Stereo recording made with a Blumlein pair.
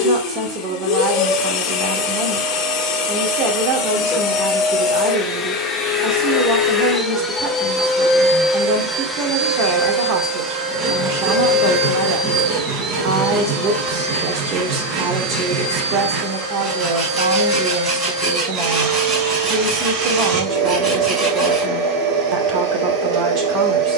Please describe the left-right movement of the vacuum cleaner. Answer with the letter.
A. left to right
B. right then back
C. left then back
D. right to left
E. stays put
A.